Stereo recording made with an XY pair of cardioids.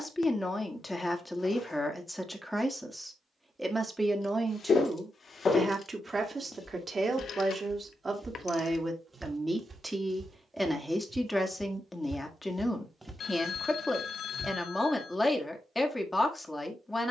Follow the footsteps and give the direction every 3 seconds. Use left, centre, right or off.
off, left, centre, right, centre, off.